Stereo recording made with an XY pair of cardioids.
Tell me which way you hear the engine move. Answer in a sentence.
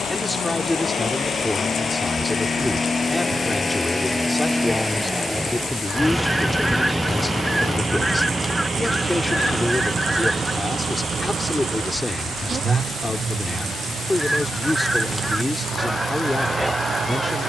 In this clip you hear the engine move to the right.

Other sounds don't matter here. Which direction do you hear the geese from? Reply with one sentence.
In this clip you hear the geese in the centre.